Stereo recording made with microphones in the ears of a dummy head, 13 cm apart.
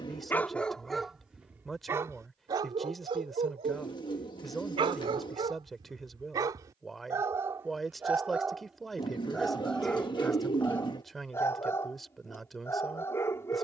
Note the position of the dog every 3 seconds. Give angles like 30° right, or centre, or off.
10° right, 40° right, 20° right, 10° left, 20° left.